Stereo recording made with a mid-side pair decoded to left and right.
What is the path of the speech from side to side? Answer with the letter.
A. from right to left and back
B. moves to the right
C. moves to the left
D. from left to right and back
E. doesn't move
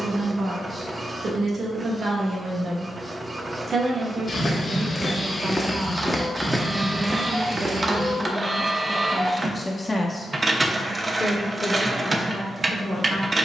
C.